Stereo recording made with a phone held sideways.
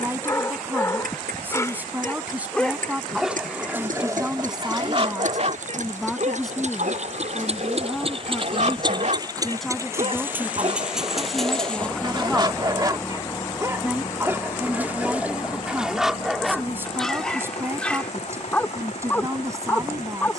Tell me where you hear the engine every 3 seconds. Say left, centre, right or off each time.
right, right, right, centre, left, left, left.